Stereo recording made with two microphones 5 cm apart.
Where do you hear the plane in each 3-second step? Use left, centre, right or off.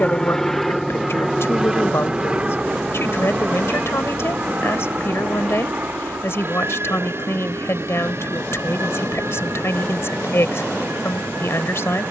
centre, right, right, right.